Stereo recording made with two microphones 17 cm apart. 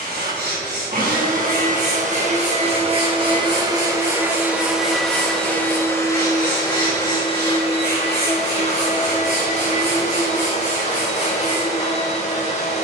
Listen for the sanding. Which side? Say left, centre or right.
right.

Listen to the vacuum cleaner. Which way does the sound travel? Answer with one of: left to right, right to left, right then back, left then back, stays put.
right to left.